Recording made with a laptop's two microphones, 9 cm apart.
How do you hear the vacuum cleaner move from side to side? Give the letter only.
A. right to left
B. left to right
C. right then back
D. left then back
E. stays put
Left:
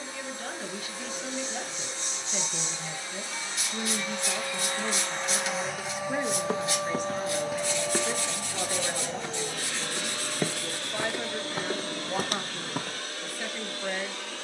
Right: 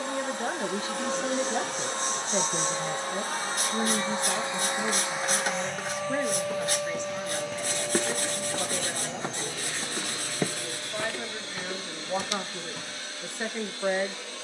A.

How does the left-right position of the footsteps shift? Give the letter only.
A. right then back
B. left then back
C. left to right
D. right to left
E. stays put
A.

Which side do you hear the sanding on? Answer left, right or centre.
right.